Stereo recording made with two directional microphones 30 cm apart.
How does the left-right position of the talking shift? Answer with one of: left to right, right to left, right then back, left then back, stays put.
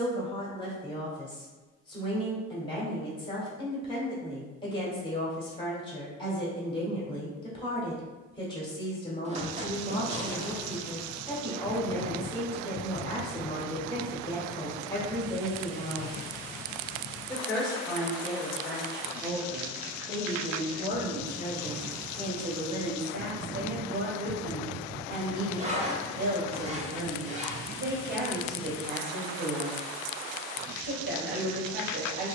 left to right.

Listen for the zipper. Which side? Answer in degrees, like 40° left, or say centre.
20° right.